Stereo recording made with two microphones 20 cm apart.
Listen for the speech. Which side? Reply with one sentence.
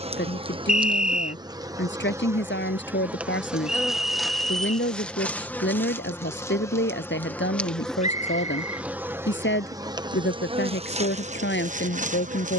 In this clip you hear the speech on the left.